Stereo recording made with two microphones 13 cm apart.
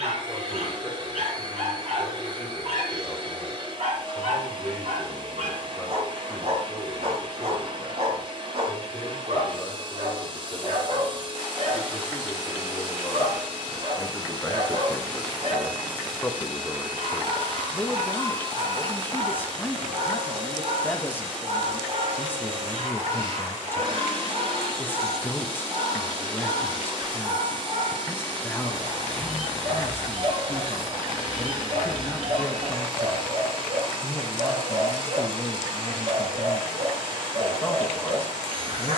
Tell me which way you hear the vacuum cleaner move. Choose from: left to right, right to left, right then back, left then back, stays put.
stays put.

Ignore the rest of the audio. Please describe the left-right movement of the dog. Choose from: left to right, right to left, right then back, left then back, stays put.
stays put.